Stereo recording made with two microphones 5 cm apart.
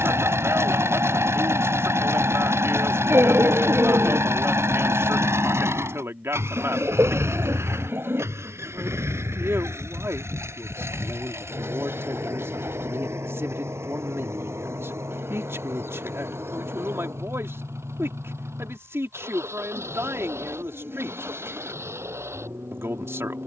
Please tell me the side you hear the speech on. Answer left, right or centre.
right.